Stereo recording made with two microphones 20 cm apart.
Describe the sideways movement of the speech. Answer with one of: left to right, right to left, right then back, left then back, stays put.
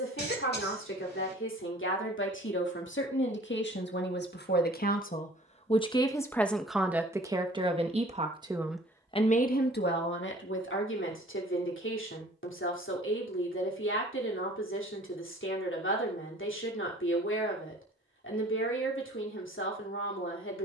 right then back.